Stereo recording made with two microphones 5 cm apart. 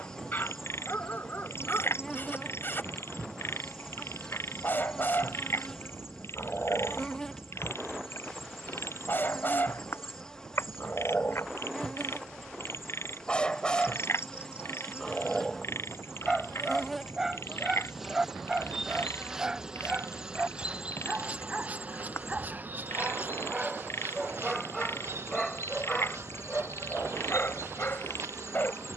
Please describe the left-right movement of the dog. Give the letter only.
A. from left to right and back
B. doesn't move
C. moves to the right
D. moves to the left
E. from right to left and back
A.